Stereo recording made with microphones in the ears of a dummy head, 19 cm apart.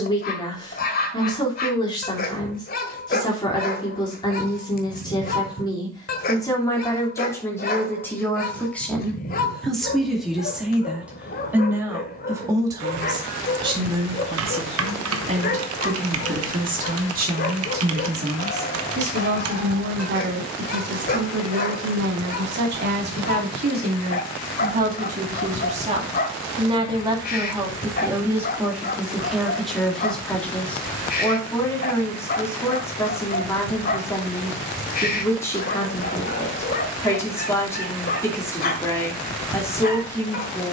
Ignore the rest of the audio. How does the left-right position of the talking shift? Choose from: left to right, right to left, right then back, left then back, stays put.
right then back.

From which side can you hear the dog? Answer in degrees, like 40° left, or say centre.
40° left.